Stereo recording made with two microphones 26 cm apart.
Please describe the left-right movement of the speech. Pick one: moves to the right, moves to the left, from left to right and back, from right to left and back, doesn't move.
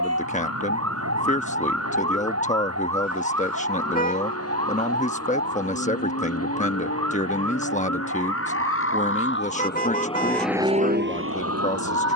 doesn't move.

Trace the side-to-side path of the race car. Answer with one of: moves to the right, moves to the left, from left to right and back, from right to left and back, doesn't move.
moves to the right.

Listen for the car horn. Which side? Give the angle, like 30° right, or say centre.
30° left.